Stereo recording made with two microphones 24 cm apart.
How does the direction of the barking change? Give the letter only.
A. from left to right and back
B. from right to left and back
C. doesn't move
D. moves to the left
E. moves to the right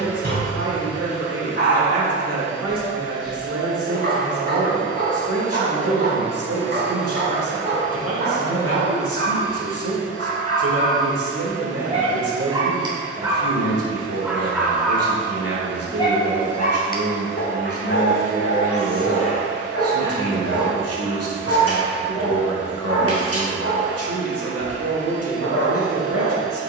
D.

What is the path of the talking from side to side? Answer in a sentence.
You can hear the talking stay put.